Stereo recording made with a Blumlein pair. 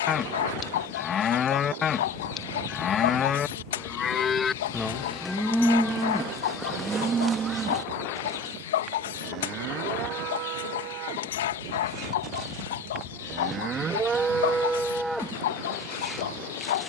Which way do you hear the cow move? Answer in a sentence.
In this clip you hear the cow move from left to right and back again.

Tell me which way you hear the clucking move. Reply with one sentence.
In this clip you hear the clucking stay in one place.